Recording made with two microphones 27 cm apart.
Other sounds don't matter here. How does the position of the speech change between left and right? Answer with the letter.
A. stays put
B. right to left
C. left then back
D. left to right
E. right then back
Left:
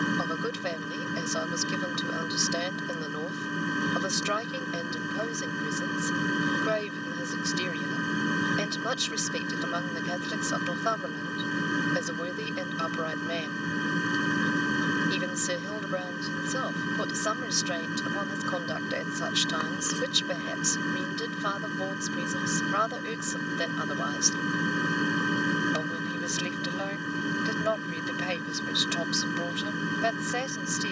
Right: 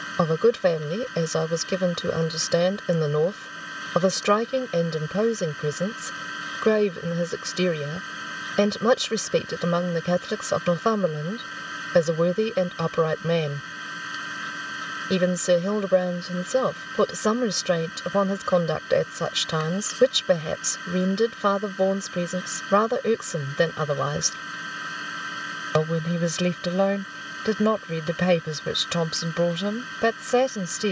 A.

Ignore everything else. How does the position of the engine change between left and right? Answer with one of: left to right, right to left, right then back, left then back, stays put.
stays put.